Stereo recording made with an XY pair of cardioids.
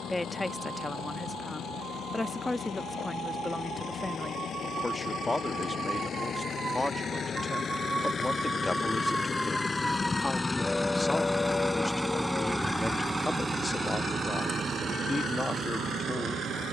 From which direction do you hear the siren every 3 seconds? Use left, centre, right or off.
right, right, right, centre, left, left.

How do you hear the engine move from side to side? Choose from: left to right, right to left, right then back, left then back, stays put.
left to right.